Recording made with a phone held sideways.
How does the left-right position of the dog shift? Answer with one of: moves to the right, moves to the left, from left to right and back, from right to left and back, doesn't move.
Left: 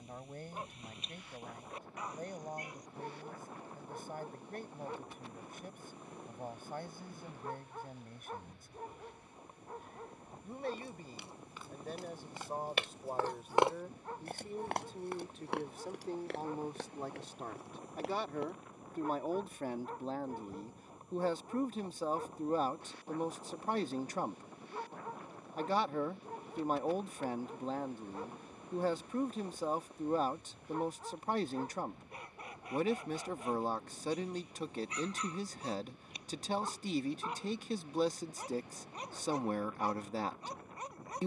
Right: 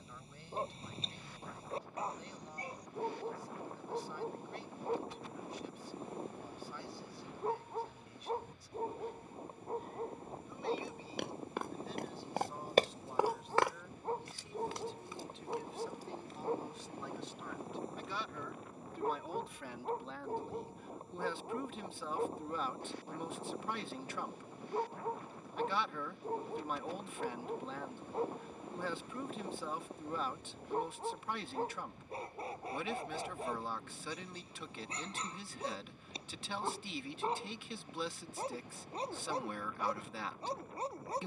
doesn't move.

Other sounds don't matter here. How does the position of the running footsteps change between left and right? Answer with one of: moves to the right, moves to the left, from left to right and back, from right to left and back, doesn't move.
moves to the left.